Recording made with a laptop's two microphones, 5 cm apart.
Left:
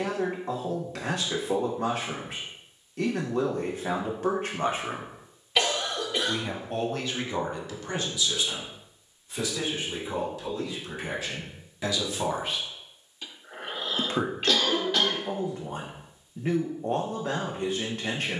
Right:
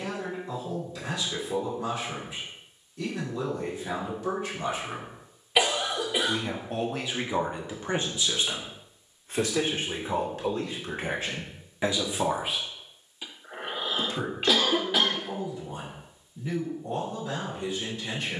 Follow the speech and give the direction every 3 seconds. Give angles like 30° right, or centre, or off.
60° left, 60° left, 20° right, 40° right, 30° left, 60° left.